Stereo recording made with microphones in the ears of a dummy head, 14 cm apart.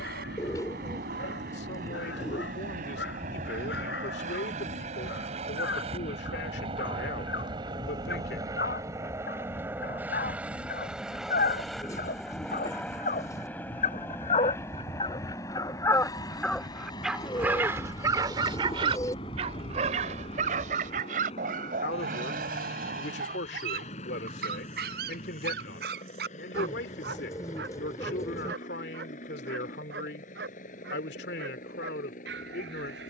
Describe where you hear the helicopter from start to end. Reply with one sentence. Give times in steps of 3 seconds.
In this clip you hear the helicopter on the right from 0 s, in the centre from 9 s and on the left from 15 s.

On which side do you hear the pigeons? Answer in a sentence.
You can hear the pigeons on the left.